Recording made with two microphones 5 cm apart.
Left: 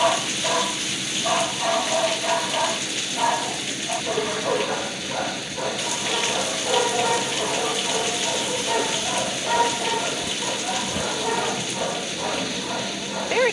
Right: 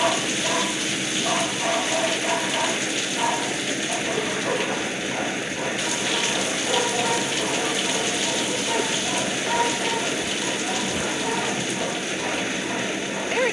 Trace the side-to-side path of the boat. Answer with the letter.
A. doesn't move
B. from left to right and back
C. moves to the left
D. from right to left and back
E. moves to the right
A.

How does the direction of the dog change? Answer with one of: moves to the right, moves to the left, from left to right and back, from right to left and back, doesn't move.
doesn't move.